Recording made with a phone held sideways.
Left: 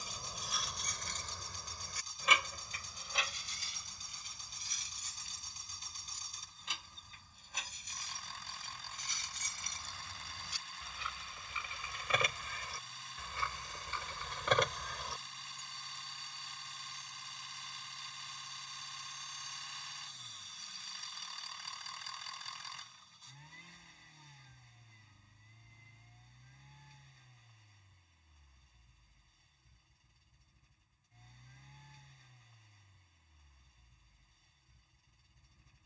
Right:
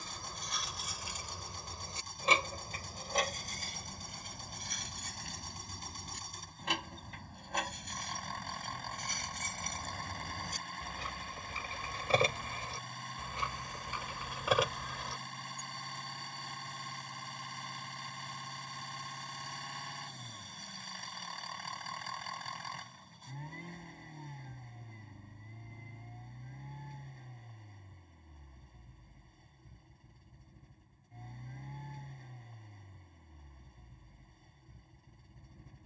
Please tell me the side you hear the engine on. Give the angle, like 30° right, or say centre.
60° right.